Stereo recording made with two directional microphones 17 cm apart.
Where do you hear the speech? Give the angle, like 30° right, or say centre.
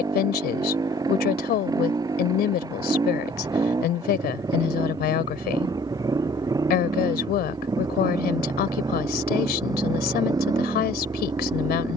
70° left.